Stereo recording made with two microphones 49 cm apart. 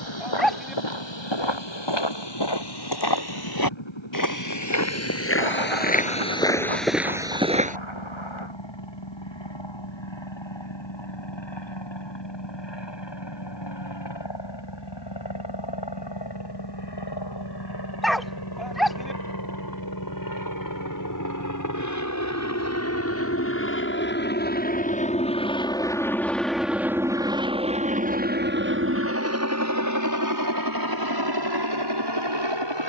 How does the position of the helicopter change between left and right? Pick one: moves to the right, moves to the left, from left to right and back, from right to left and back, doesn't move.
moves to the right.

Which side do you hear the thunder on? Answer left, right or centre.
right.